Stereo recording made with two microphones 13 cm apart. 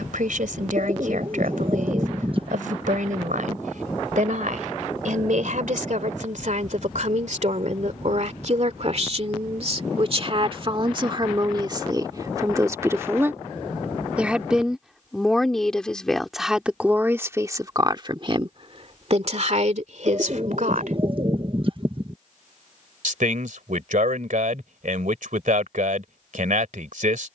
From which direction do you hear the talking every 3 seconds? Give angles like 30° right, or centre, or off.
80° right, 70° right, 60° right, 40° right, 20° right, 10° right, 50° right, 70° right, 70° right.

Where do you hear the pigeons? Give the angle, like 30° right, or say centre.
40° right.